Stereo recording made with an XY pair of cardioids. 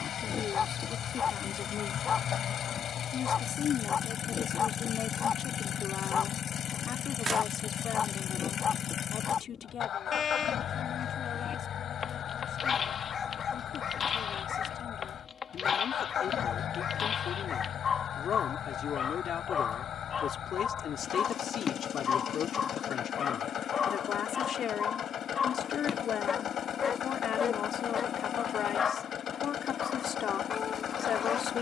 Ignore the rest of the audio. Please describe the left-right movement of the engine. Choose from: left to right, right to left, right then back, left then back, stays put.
stays put.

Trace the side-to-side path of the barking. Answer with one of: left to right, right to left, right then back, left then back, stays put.
stays put.